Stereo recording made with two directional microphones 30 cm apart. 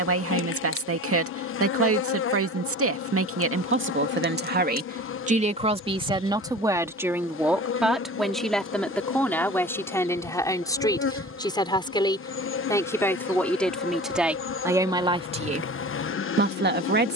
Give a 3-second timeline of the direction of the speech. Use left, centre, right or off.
right, right, centre, centre, centre, right.